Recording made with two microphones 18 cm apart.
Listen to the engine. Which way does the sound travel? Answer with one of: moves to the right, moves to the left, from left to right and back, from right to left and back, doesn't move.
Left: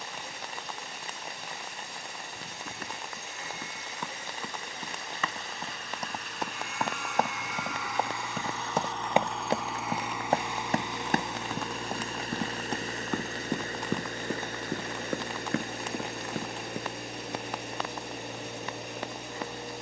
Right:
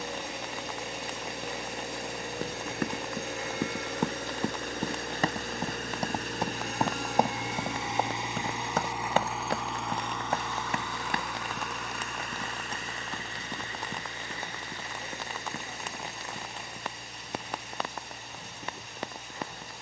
moves to the left.